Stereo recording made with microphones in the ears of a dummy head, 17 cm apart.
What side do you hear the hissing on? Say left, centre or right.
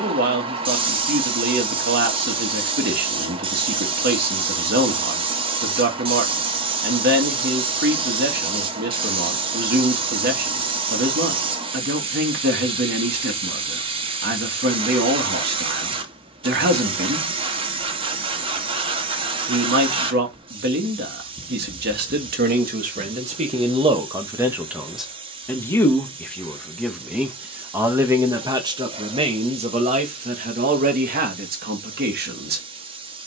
right.